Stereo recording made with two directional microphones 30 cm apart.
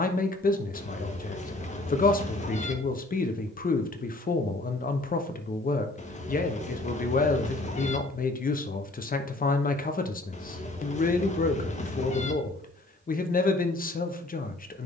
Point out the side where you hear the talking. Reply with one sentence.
In this clip you hear the talking on the left.